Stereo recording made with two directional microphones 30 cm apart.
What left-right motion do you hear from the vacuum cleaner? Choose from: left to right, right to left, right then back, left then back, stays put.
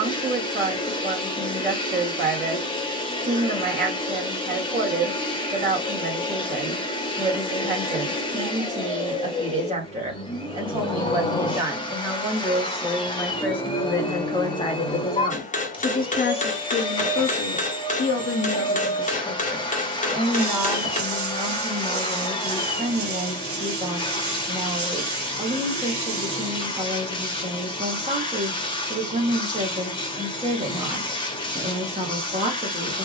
stays put.